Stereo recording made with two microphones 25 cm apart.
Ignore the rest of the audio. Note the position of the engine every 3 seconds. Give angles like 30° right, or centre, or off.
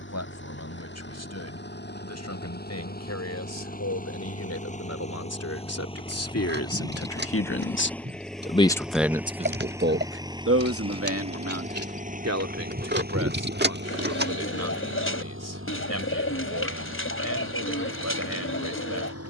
40° left, 30° left, 10° left, 20° right, 40° right, 60° right, 60° right.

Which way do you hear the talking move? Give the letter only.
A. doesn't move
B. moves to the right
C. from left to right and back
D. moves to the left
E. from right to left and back
B.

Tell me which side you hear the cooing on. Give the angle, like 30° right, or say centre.
50° left.